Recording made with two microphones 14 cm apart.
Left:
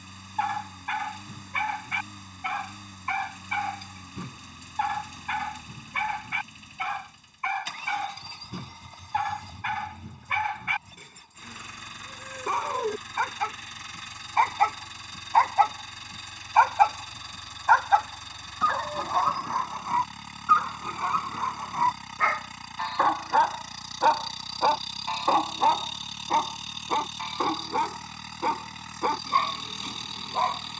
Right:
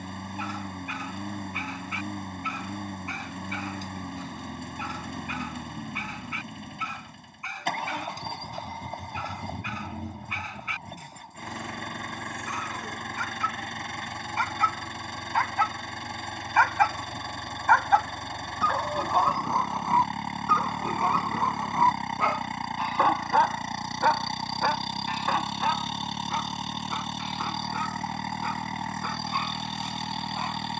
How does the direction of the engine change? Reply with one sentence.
In this clip you hear the engine stay in one place.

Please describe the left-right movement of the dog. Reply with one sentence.
You can hear the dog go right and come back.